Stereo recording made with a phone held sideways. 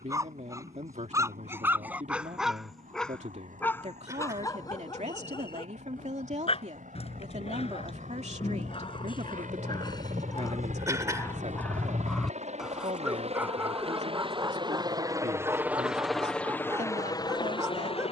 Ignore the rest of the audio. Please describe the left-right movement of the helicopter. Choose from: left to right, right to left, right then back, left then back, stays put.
right to left.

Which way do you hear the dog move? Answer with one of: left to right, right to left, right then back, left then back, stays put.
left then back.